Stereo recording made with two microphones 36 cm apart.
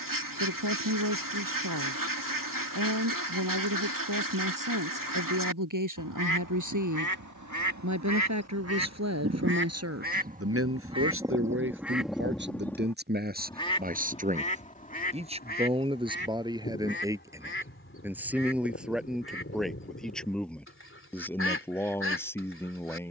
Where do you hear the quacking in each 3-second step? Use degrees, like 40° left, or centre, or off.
70° right, 70° right, 60° right, 20° right, 10° left, 30° left, 40° left, 40° left.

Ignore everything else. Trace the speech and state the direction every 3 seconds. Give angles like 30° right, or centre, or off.
70° right, 70° right, 60° right, 40° right, 30° right, 10° right, centre, 10° left.